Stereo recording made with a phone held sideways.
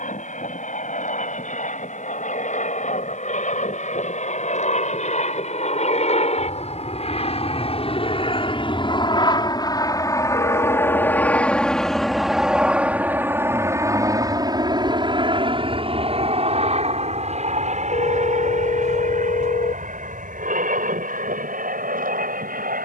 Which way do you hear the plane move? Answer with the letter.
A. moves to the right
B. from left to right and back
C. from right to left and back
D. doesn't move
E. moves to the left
A.